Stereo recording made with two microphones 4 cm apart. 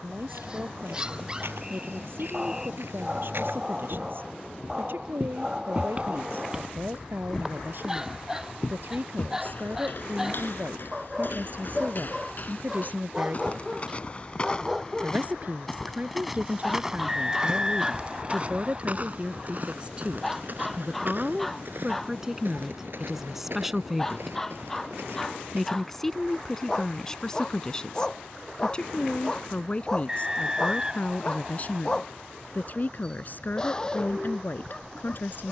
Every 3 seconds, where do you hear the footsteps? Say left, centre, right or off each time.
right, right, centre, left, left, centre, right, right, right, off, off, off.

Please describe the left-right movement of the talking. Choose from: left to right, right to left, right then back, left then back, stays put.
right to left.